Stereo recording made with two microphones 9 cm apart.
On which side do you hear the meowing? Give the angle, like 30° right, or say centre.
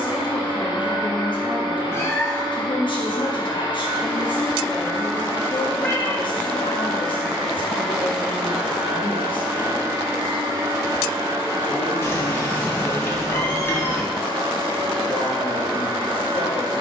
20° left.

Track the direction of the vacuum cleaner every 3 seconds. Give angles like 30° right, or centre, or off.
50° left, 40° left, centre, 30° right, 50° right, 50° right.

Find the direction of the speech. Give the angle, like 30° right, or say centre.
60° left.